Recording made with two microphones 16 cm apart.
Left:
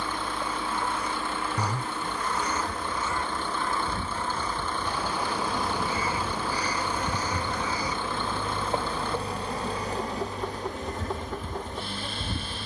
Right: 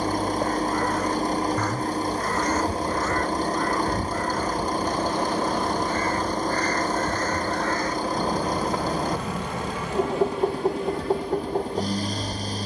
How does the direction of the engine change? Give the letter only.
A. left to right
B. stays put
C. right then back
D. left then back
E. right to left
B.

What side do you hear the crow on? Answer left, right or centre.
centre.